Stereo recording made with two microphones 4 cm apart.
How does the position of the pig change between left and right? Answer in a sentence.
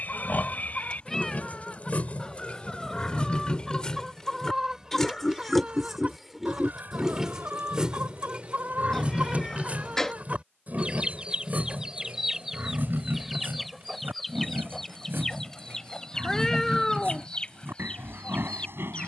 In this clip you hear the pig go from the left side to the right.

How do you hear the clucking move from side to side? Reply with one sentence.
In this clip you hear the clucking go right and come back.